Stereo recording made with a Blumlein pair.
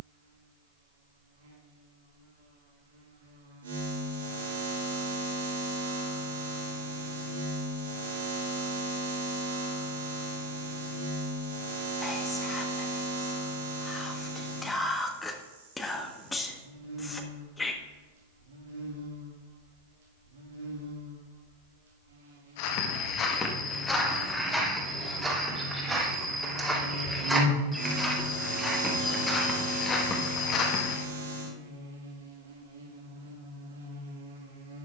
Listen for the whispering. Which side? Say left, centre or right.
centre.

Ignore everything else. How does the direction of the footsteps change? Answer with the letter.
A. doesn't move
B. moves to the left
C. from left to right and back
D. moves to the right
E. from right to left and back
C.